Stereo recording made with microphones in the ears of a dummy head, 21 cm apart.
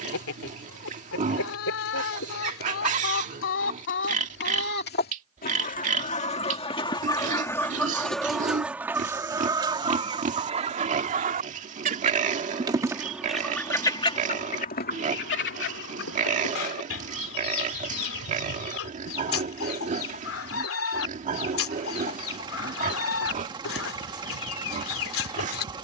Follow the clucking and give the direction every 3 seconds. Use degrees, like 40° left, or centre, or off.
60° left, 50° left, 10° left, 20° right, 10° left, 60° left, 60° left, 60° left, 60° left.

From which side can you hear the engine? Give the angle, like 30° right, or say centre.
20° right.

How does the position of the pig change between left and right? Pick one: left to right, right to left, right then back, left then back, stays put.
stays put.